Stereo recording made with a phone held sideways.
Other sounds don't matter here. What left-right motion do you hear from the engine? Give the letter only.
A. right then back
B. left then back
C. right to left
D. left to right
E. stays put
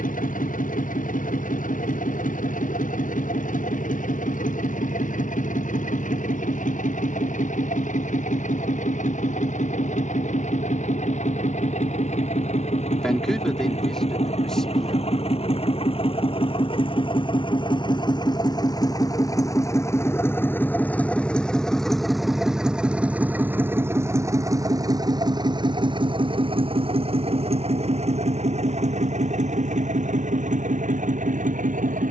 D.